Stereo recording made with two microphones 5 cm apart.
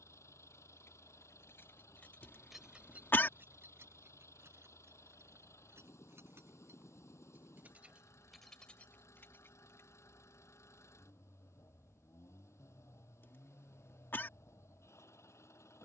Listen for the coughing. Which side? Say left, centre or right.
left.